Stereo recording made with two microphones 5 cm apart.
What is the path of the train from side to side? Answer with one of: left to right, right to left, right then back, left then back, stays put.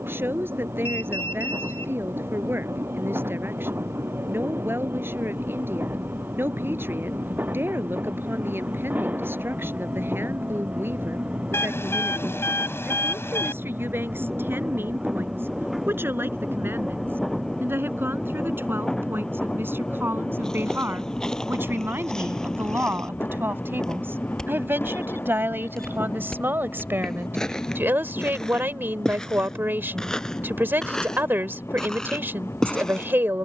right to left.